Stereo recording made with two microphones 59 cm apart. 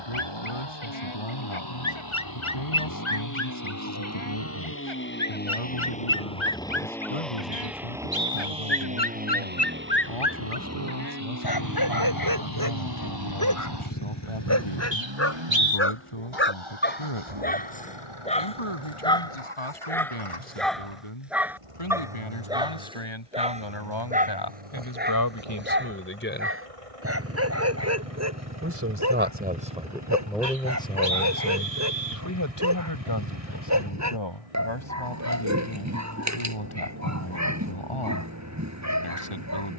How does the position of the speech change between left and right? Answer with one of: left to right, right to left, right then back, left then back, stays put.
right then back.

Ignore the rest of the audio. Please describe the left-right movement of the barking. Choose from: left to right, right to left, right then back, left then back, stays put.
left to right.